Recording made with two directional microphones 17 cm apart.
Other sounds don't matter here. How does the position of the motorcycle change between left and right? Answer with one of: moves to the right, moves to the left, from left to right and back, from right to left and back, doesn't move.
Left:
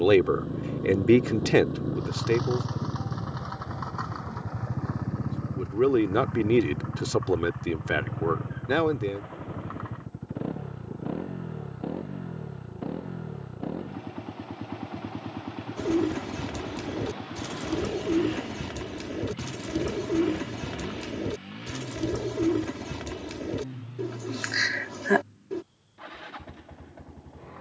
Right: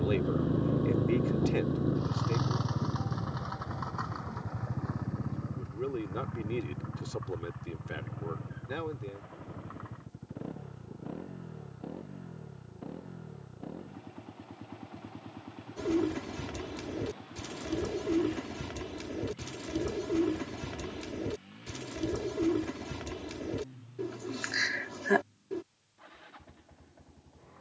moves to the left.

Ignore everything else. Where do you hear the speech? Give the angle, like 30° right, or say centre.
70° left.